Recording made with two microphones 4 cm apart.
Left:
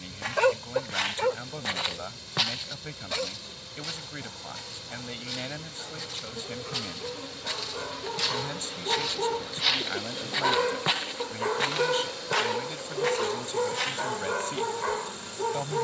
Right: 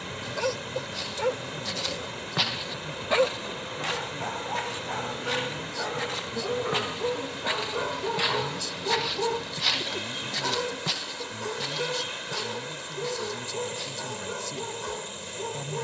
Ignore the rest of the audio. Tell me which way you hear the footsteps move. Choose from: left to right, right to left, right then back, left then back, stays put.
right then back.